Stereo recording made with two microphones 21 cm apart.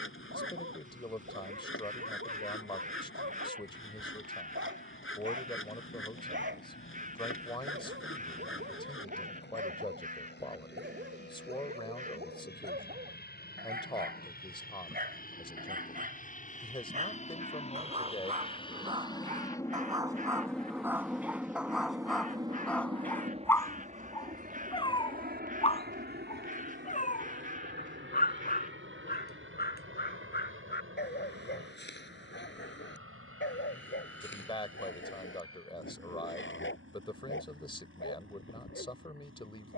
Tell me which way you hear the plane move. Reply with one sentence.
In this clip you hear the plane travel towards the right.